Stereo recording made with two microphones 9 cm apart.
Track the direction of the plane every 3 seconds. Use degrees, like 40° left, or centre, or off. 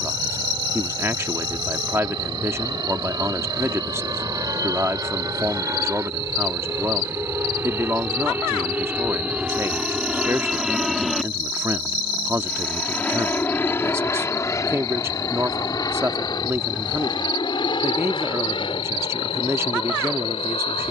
50° right, 40° right, 30° right, 10° right, 20° left, 40° left, 60° left.